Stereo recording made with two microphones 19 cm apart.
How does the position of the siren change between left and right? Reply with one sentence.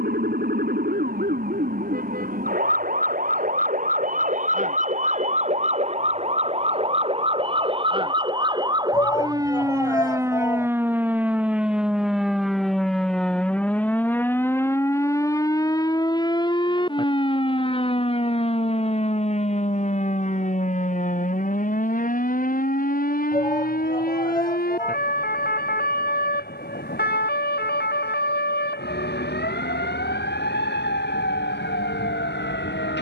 You can hear the siren move to the left.